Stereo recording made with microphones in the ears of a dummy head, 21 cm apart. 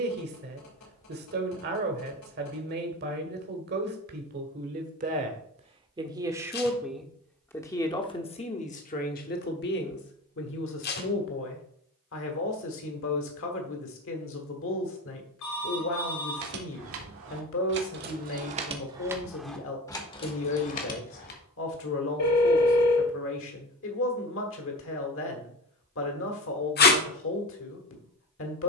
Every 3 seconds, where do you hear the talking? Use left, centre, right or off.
right, right, centre, left, left, left, left, left, left, left.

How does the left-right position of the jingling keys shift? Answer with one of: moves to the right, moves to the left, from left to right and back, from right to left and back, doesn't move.
moves to the left.